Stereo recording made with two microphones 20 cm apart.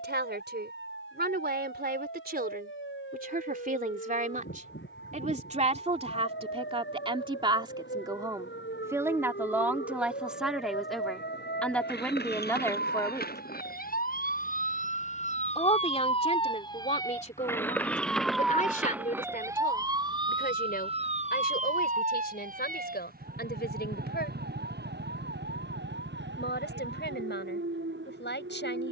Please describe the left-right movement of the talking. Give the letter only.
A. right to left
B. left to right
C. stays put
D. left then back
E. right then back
A.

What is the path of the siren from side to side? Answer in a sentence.
In this clip you hear the siren go from the left side to the right.